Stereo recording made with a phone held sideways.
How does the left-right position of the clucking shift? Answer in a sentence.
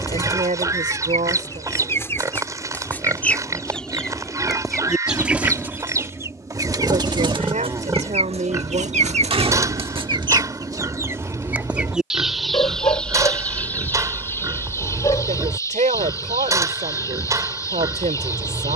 You can hear the clucking go right and come back.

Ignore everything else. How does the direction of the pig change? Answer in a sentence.
You can hear the pig stay put.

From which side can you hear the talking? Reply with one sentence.
In this clip you hear the talking on the right.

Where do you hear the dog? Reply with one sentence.
You can hear the dog on the left.